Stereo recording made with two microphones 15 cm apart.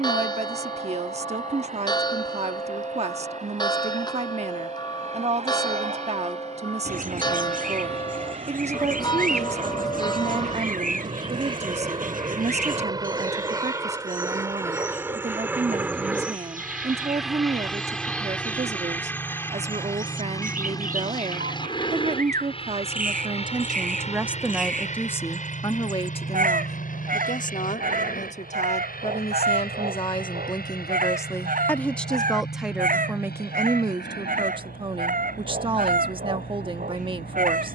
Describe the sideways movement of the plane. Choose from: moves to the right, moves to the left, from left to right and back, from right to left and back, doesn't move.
moves to the left.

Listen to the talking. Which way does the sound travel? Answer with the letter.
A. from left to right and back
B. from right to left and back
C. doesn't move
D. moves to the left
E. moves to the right
B.